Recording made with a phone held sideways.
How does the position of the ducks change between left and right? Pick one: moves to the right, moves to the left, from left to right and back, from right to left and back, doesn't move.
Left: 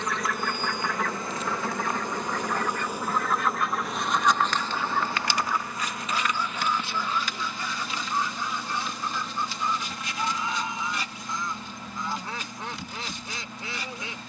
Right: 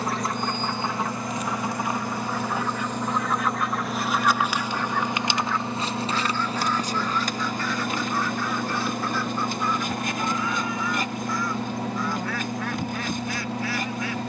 moves to the left.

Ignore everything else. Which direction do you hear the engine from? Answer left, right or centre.
right.